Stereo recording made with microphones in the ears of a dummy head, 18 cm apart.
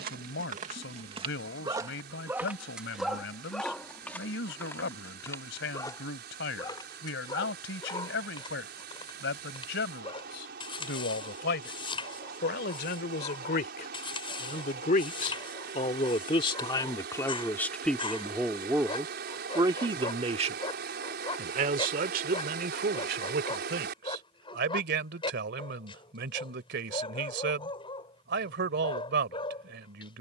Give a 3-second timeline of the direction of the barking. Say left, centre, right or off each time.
right, centre, left, left, left, left, left, left, left, left.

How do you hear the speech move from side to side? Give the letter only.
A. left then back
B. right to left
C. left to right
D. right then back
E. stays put
C.